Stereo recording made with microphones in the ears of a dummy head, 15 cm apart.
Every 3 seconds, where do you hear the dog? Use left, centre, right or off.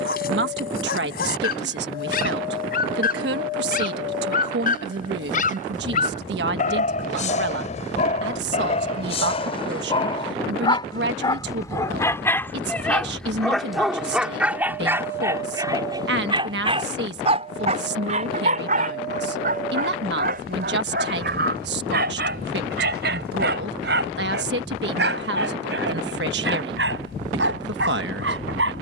left, left, left, left, centre, right, right, right, right, right.